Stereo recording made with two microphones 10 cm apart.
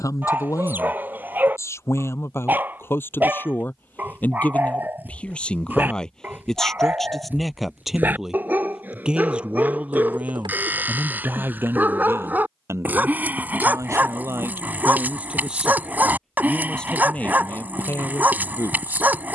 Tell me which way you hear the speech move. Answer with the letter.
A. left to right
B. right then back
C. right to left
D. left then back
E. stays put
B.